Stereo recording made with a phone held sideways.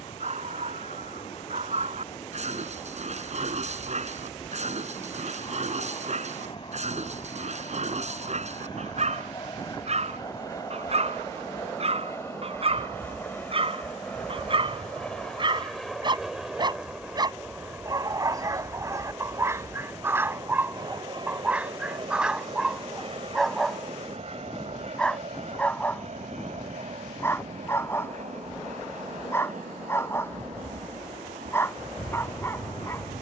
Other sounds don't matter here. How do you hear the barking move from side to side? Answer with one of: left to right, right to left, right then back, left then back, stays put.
right to left.